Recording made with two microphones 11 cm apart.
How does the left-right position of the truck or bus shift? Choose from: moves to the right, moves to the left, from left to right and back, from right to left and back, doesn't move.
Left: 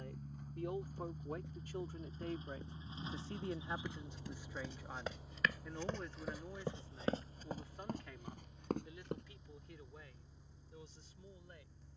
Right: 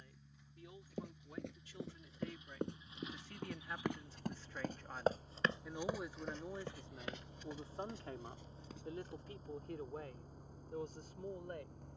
moves to the right.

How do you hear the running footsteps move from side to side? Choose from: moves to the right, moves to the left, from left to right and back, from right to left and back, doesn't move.
moves to the left.